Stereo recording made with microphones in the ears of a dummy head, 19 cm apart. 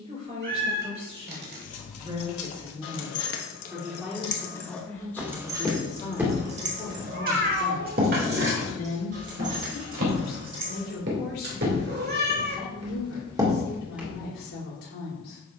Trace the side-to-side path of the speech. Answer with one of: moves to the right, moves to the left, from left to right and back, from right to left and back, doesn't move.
moves to the left.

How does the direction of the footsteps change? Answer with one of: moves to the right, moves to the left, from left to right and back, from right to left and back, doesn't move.
from left to right and back.